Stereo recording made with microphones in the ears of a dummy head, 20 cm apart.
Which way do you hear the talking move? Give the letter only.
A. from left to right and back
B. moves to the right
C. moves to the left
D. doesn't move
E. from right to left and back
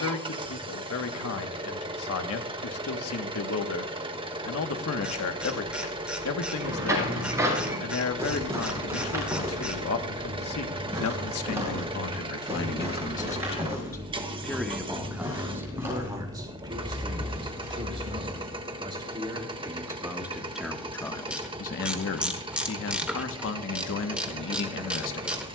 A.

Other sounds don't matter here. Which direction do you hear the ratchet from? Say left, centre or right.
centre.